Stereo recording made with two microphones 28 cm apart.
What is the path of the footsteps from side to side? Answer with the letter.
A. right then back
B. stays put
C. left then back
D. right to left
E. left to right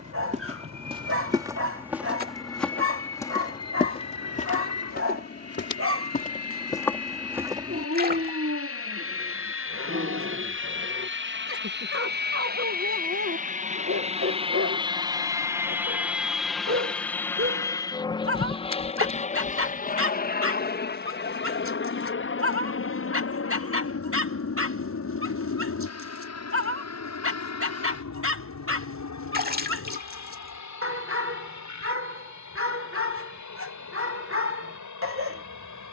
C.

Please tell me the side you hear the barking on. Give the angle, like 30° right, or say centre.
50° right.